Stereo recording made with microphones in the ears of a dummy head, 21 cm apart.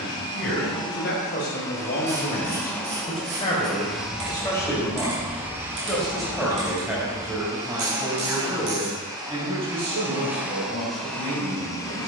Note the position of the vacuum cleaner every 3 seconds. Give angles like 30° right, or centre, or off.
20° left, centre, 20° right, centre.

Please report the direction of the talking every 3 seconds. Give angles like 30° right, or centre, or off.
40° left, 20° left, 10° right, 30° right.